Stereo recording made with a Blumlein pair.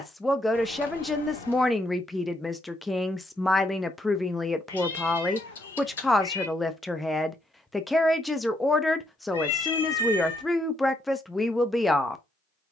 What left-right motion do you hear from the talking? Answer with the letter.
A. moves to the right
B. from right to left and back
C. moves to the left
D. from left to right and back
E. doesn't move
E.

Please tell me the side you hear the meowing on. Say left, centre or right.
left.